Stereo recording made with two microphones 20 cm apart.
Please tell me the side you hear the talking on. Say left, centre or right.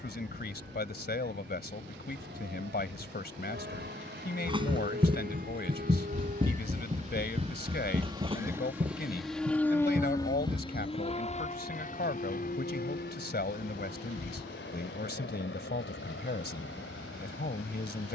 left.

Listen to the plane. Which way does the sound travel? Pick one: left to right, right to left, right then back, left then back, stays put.
right to left.